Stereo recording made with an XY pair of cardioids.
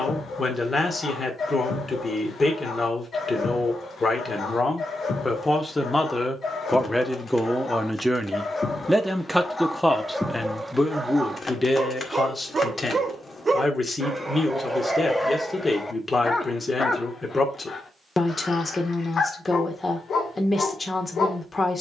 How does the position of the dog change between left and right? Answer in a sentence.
You can hear the dog go right and come back.